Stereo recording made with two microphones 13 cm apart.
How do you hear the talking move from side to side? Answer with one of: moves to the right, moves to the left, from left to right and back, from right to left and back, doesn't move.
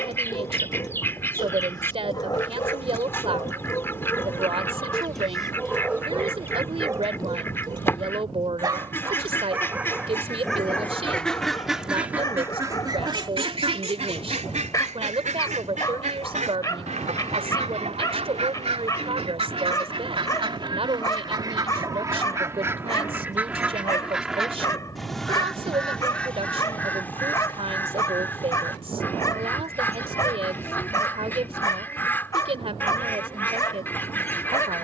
doesn't move.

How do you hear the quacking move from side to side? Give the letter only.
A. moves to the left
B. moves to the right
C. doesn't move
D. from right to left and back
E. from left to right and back
E.